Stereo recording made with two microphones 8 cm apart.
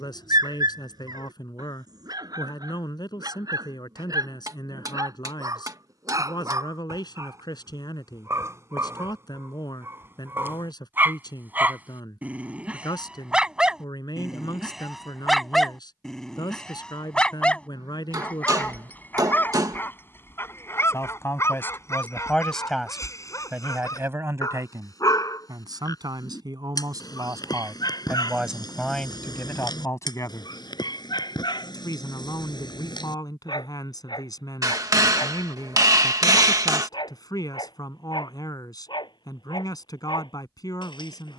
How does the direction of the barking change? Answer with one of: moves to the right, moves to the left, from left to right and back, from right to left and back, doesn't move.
moves to the left.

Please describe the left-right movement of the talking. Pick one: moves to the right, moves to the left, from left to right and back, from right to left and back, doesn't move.
from left to right and back.